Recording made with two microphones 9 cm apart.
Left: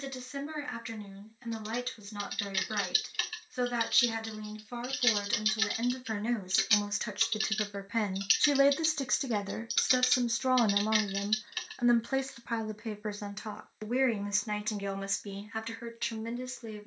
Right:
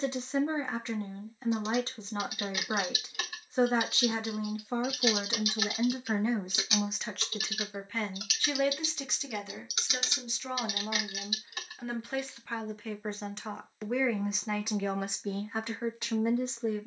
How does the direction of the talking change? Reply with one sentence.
In this clip you hear the talking move from right to left and back again.